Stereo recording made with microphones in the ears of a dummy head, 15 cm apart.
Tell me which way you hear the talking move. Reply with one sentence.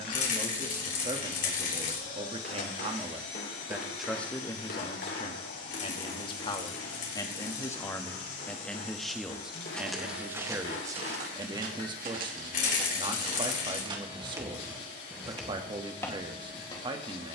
You can hear the talking move from right to left and back again.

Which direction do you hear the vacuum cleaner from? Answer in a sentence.
In this clip you hear the vacuum cleaner on the left.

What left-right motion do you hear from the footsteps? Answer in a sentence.
You can hear the footsteps move from left to right and back again.